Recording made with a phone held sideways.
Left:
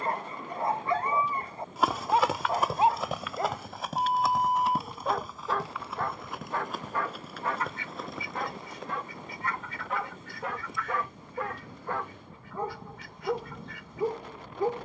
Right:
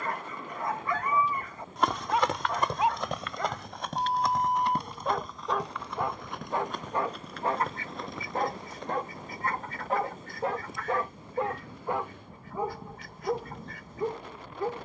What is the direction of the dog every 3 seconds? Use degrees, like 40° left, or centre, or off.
30° left, 10° left, 30° right, 30° right, centre.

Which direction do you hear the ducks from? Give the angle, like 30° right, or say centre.
40° right.